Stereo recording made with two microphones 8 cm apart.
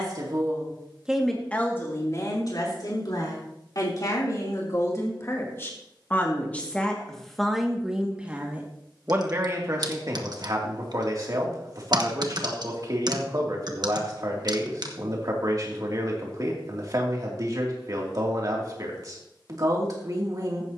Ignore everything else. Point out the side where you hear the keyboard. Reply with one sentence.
You can hear the keyboard on the right.